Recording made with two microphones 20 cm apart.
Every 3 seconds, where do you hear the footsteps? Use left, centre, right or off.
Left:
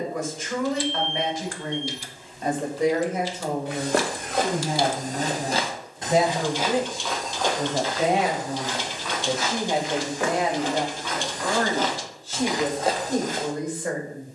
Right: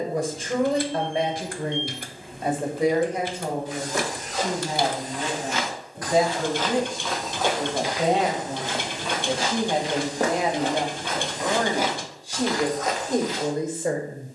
off, left, centre, right, left.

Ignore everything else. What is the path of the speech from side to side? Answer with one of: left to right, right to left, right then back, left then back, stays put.
left then back.